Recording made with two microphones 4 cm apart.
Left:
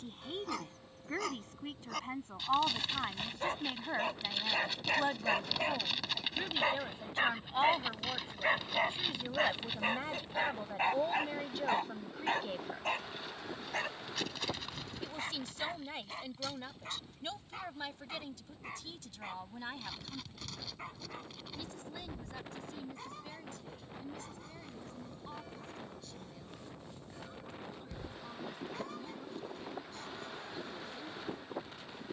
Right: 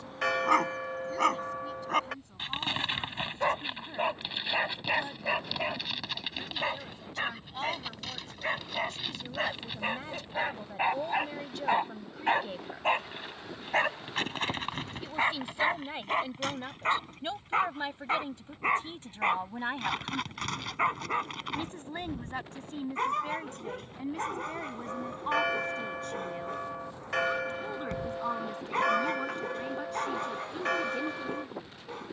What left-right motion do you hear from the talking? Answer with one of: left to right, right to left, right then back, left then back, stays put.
left to right.